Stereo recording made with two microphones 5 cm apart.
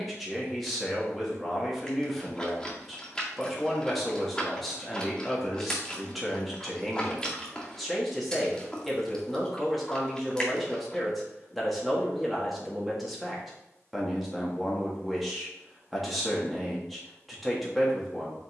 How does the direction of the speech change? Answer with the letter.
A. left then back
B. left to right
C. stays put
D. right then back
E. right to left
C.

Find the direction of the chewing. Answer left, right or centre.
centre.